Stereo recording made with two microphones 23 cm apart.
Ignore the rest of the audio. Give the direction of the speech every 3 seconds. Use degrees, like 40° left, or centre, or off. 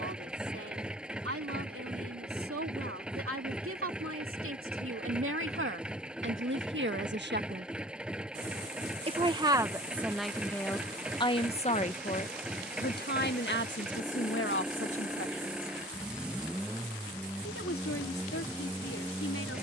70° right, 70° right, 50° right, centre, 50° left, 70° left, 70° left.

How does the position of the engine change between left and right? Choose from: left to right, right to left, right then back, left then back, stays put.
stays put.